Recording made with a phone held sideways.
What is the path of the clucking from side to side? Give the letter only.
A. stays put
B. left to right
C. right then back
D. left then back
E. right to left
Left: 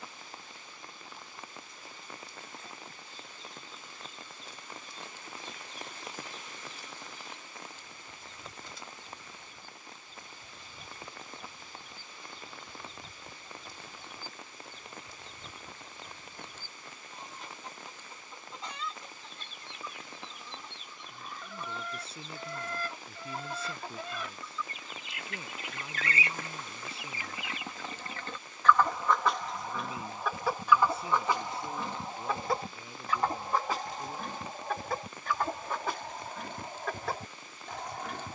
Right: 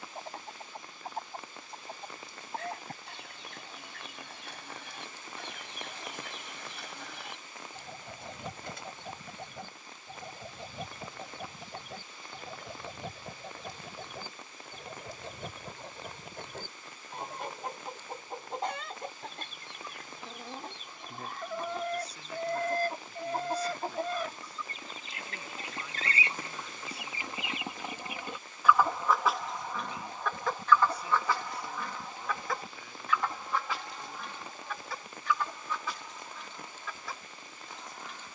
E.